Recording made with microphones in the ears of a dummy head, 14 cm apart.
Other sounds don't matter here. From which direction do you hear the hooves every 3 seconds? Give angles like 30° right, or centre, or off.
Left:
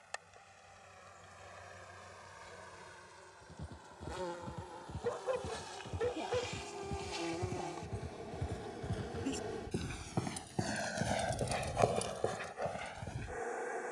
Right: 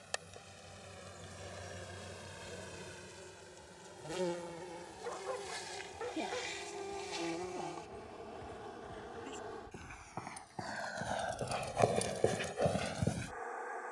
off, 60° left, 60° left, 30° left, 40° right.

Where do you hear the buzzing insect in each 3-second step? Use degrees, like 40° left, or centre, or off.
40° right, 30° right, centre, 30° left, 30° left.